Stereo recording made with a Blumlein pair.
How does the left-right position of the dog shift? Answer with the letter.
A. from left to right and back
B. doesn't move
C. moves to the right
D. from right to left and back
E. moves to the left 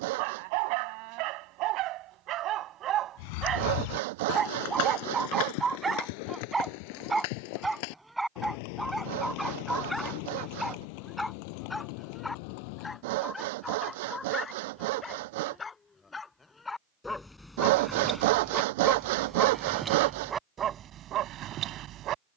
D.